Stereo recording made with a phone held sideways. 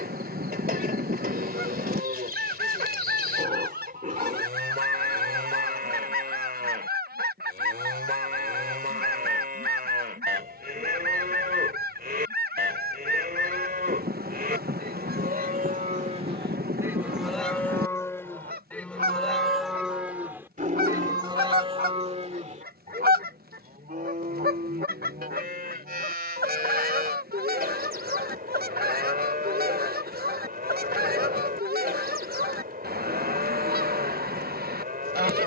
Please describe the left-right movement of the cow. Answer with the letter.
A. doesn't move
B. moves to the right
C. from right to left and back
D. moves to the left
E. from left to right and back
C.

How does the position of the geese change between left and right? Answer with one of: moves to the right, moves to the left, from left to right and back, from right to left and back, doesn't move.
doesn't move.